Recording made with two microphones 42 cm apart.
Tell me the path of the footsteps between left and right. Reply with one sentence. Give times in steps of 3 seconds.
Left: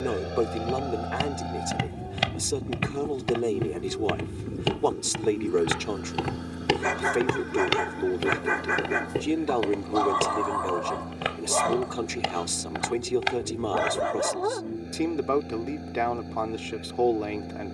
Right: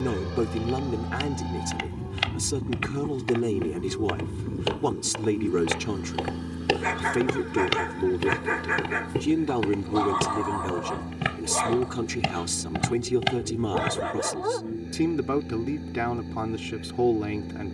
You can hear the footsteps on the left from 0 s, in the centre from 6 s, on the right from 9 s and not at all from 15 s.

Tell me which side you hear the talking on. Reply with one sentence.
You can hear the talking on the right.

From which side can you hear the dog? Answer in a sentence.
You can hear the dog on the left.